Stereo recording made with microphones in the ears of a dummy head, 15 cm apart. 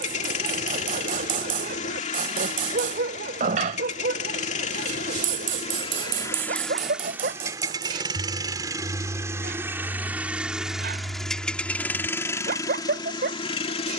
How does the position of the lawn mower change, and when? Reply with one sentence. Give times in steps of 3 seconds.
You can hear the lawn mower on the left from 0 s, in the centre from 6 s and on the left from 12 s.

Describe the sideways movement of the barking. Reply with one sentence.
In this clip you hear the barking stay put.